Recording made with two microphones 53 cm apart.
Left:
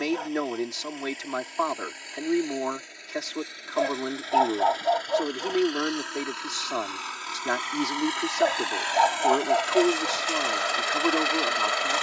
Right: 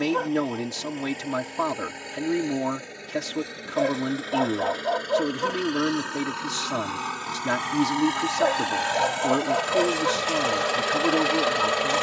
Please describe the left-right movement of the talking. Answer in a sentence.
You can hear the talking stay put.